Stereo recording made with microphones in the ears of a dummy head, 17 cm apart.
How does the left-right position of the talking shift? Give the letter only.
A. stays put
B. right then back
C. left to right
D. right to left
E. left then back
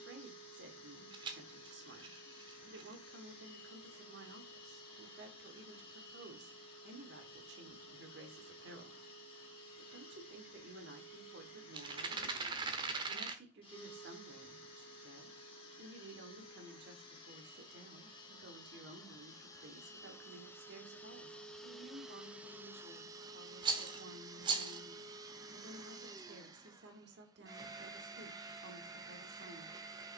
A.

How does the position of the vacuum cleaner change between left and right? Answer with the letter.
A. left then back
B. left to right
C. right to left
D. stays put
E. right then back
B.